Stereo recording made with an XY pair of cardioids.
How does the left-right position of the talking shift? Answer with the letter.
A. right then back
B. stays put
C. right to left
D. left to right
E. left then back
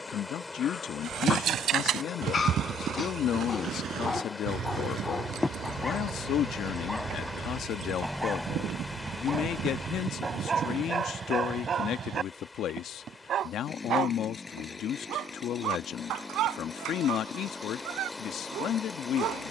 B.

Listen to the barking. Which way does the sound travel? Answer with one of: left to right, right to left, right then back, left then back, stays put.
left to right.